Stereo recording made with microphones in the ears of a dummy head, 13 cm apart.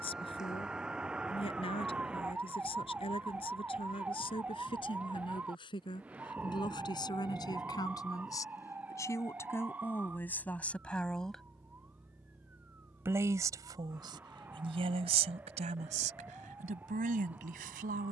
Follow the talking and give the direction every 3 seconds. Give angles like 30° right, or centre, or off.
40° left, 40° left, 30° left, 10° left, 30° right, 60° right.